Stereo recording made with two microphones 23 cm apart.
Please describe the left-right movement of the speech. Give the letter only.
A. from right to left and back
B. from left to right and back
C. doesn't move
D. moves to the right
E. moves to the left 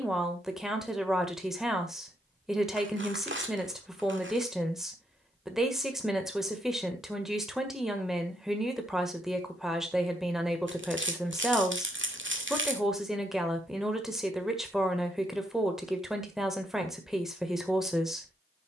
C.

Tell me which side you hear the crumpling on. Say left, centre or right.
right.